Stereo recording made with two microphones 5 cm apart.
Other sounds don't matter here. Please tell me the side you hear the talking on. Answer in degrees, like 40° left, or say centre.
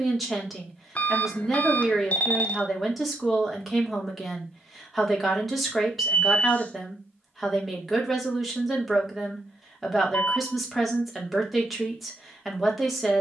centre.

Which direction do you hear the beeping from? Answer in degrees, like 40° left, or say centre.
30° left.